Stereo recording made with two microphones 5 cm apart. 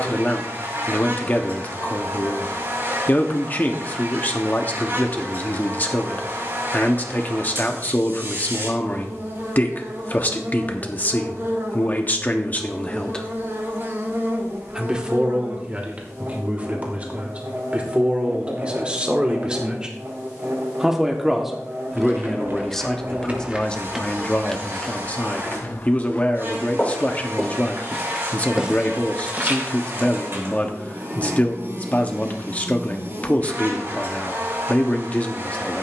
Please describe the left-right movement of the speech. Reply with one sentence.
In this clip you hear the speech go right and come back.